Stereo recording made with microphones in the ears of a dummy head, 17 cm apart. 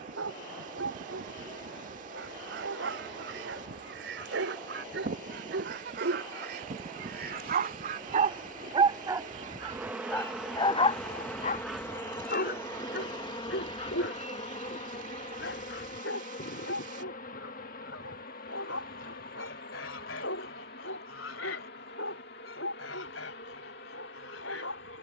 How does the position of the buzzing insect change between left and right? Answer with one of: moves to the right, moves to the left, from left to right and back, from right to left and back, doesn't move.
moves to the left.